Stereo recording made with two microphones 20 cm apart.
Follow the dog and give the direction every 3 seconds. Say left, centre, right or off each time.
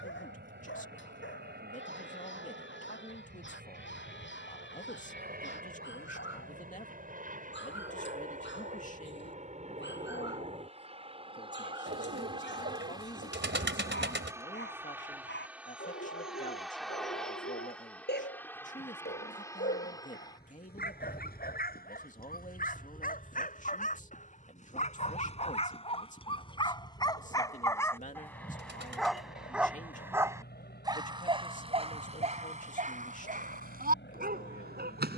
left, left, left, left, left, left, left, left, left, centre, right, right.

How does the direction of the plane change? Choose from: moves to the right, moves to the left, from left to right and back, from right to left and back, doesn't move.
moves to the left.